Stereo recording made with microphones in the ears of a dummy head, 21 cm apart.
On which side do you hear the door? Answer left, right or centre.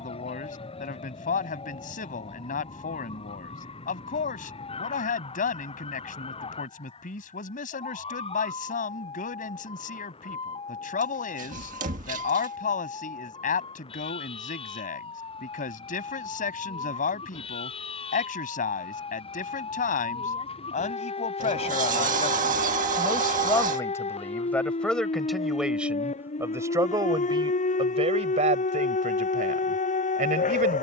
right.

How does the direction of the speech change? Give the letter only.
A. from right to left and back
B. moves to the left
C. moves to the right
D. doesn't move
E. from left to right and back
C.